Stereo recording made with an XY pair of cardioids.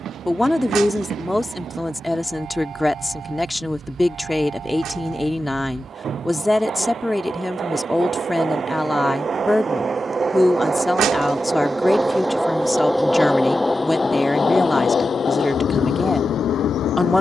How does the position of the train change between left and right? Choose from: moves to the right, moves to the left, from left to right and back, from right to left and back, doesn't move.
moves to the left.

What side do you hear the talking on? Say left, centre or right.
centre.